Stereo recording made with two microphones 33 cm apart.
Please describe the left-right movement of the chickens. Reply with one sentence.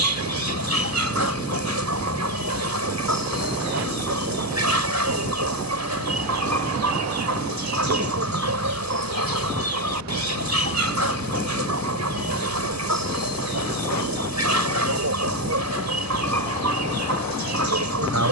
In this clip you hear the chickens stay put.